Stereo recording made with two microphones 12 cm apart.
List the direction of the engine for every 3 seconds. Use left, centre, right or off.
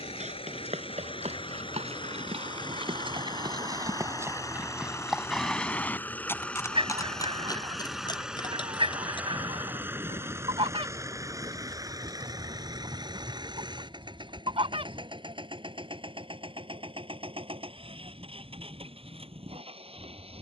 left, left, centre, right, right, right, right.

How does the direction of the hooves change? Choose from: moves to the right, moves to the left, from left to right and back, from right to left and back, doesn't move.
moves to the left.